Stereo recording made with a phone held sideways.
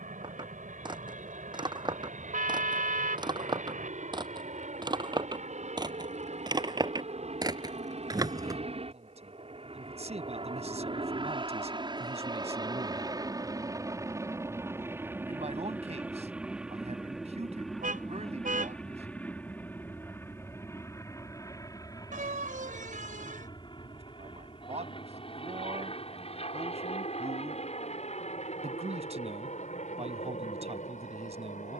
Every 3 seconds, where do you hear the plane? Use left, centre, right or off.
right, right, right, right, right, centre, centre, left, left, left, left.